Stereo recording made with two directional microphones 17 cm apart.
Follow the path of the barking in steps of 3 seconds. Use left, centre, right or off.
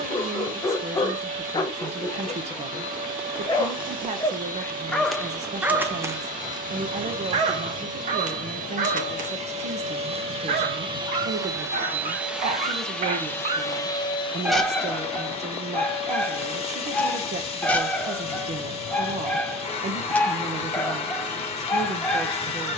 left, centre, right, right, right, centre, centre, centre.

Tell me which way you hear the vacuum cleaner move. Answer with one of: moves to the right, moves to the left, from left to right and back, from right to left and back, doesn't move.
moves to the left.